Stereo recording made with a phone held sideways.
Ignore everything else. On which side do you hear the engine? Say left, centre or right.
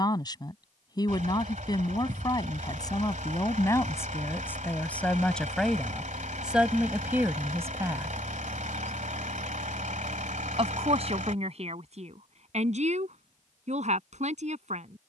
right.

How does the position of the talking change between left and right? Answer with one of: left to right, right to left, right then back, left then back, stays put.
left to right.